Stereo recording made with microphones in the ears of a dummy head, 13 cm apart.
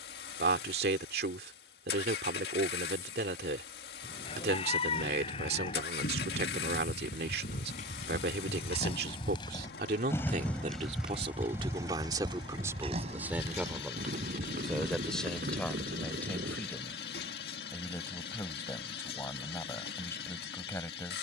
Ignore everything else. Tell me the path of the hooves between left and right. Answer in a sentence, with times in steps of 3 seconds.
You can hear the hooves not at all from 0 s, on the left from 3 s, in the centre from 9 s, on the right from 12 s and not at all from 18 s.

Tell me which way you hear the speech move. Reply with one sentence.
In this clip you hear the speech move from right to left.